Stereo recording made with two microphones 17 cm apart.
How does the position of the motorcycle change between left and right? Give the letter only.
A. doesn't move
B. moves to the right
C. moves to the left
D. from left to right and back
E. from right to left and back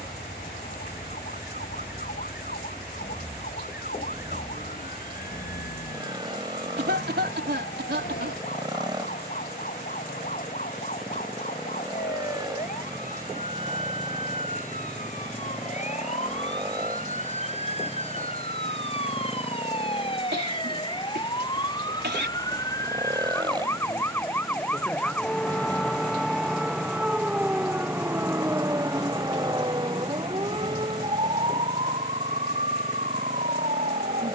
A.